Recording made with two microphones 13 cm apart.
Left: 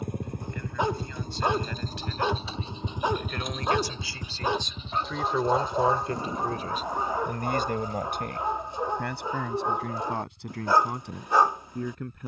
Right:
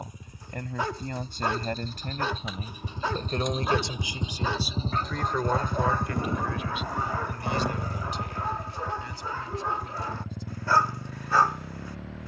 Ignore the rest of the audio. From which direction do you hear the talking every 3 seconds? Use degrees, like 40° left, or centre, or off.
50° right, 10° right, 50° left, 70° left.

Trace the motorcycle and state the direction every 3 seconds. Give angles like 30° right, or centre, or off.
40° left, 20° right, 70° right, 80° right.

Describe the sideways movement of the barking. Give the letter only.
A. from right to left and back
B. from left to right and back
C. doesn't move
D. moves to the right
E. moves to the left
C.